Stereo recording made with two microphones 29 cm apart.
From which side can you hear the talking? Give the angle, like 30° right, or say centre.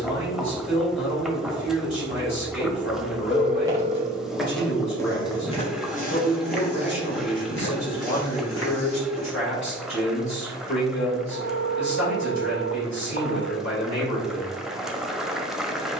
70° left.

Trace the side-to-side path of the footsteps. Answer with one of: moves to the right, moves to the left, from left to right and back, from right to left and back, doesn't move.
moves to the left.